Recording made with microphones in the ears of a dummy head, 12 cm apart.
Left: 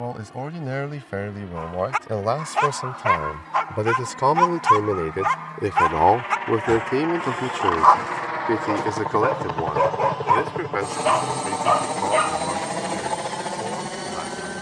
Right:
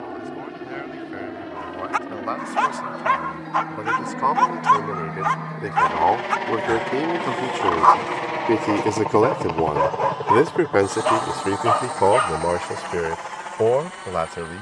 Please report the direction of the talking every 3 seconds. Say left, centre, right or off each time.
left, left, centre, right, right.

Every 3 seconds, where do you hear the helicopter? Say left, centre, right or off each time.
right, right, right, centre, left.